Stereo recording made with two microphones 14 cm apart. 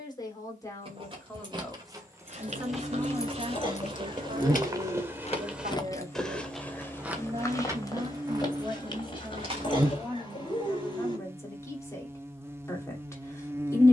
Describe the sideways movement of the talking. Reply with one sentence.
You can hear the talking go right and come back.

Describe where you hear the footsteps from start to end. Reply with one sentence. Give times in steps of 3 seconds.
In this clip you hear the footsteps on the right from 0 s, on the left from 6 s and not at all from 12 s.